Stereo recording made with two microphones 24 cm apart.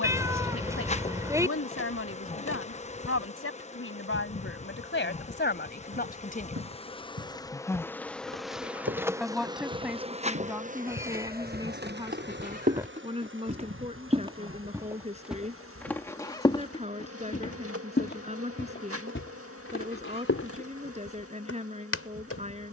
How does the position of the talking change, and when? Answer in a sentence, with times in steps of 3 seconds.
You can hear the talking on the left from 0 s, in the centre from 9 s and on the right from 12 s.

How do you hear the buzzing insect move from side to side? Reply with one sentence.
You can hear the buzzing insect move from left to right.